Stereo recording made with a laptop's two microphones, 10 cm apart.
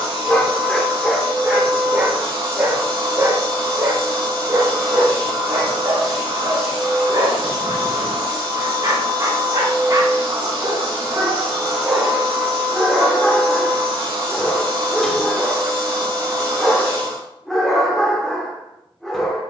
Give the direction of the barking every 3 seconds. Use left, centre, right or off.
centre, right, right, right, centre, centre, centre.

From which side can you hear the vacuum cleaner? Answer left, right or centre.
right.